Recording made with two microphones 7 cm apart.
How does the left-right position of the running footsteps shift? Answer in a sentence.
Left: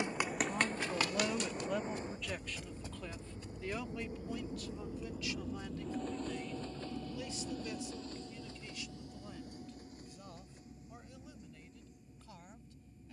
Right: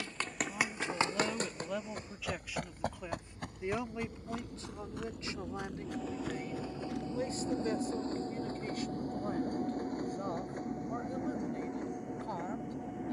In this clip you hear the running footsteps move to the right.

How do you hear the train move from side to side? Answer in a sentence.
In this clip you hear the train go from the left side to the right.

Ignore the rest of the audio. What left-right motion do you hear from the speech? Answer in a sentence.
You can hear the speech go from the left side to the right.